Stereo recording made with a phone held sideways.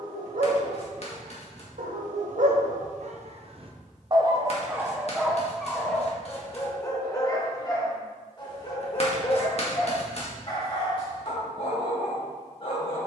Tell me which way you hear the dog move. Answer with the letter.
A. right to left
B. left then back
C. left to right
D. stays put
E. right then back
A.